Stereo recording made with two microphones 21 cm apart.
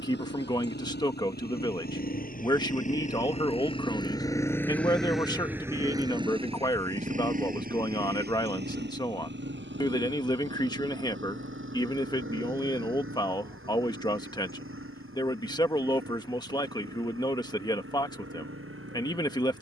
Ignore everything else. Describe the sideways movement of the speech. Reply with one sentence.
You can hear the speech stay in one place.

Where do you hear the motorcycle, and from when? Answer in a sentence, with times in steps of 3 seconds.
In this clip you hear the motorcycle on the left from 0 s, in the centre from 3 s and on the right from 6 s.